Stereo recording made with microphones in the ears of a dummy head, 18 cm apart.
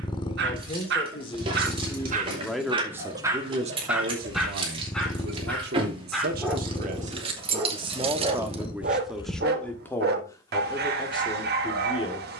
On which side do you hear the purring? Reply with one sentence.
You can hear the purring on the left.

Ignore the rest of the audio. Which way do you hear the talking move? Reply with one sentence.
In this clip you hear the talking go right and come back.